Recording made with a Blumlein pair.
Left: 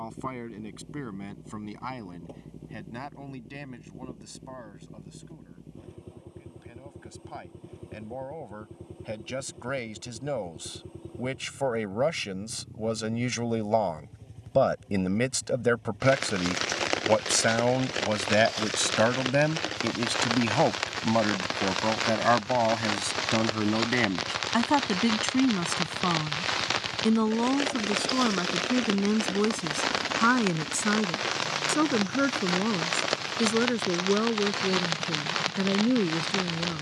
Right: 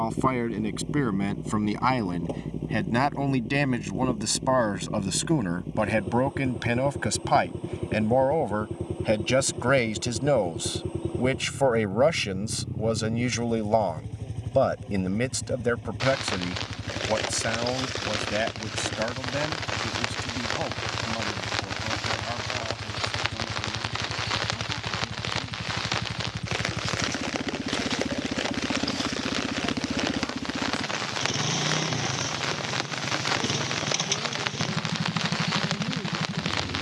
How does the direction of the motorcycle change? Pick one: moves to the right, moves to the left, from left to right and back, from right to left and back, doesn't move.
doesn't move.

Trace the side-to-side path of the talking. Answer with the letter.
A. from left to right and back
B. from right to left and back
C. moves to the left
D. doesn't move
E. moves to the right
C.